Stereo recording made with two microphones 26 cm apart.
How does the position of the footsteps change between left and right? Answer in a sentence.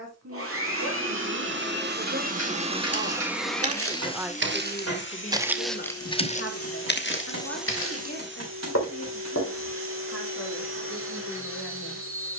In this clip you hear the footsteps move to the left.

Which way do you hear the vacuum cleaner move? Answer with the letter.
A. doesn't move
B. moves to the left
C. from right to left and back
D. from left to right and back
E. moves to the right
C.